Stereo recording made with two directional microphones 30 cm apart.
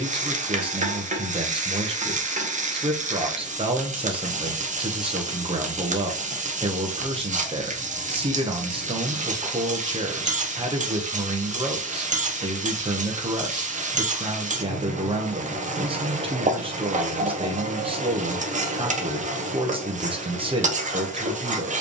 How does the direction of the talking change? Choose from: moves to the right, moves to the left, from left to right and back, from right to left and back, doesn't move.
doesn't move.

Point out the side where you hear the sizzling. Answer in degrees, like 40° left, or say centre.
20° right.